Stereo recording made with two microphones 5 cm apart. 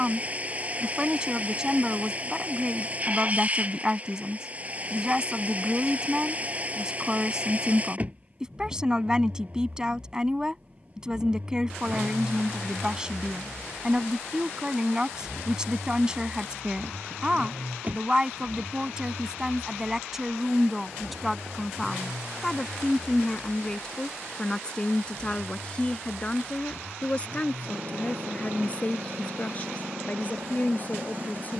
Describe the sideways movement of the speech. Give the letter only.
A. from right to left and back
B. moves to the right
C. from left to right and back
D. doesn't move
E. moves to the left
E.